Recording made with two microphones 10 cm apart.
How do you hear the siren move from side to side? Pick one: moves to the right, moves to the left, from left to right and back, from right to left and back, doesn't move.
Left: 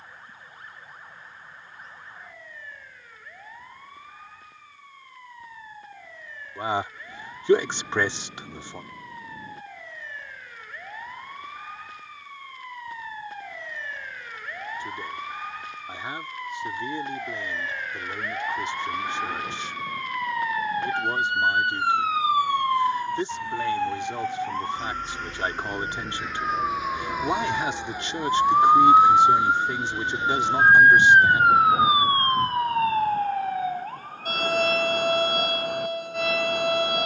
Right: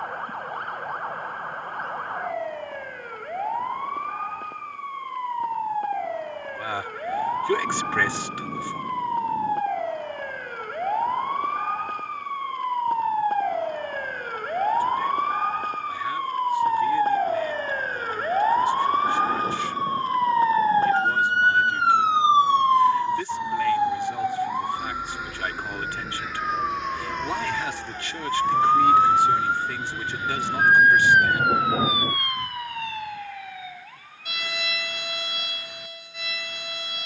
moves to the left.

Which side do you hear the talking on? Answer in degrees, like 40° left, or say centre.
20° left.